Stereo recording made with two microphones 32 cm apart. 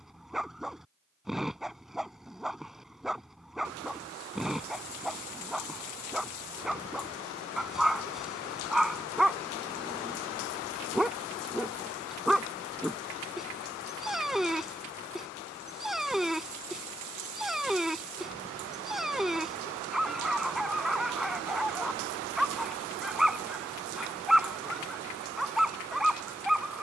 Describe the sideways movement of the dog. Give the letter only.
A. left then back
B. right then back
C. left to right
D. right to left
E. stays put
E.